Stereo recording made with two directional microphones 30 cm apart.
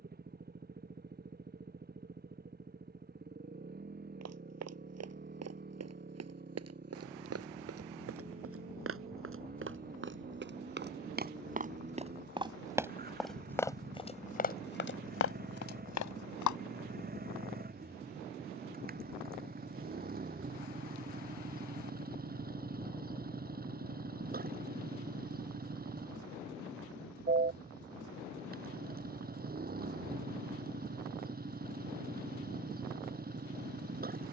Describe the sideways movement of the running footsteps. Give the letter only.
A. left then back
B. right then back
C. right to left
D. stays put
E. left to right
C.